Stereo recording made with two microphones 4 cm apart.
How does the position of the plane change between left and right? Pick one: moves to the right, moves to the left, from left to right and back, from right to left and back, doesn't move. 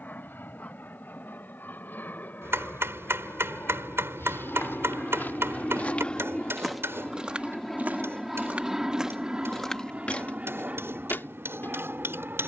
moves to the right.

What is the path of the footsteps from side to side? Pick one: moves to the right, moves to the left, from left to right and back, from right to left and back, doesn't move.
from left to right and back.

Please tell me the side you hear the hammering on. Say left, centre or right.
right.